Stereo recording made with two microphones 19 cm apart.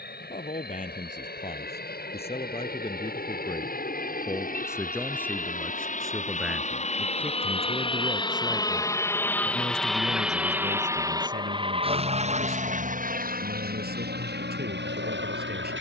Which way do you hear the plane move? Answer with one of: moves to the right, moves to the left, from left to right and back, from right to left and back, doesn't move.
moves to the right.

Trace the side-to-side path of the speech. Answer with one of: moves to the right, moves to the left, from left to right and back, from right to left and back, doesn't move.
moves to the right.